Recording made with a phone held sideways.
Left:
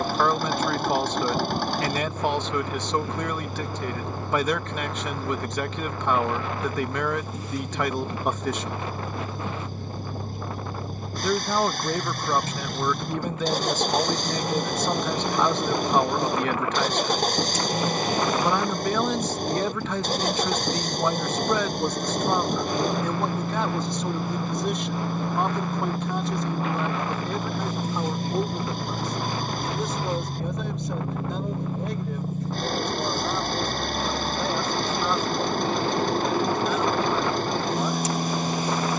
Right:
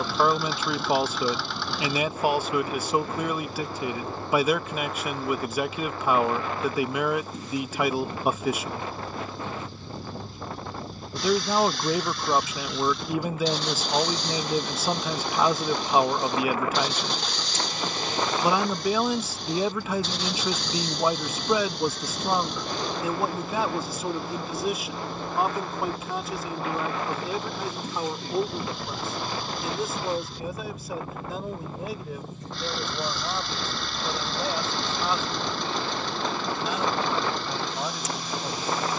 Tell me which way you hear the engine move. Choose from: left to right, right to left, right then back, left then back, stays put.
stays put.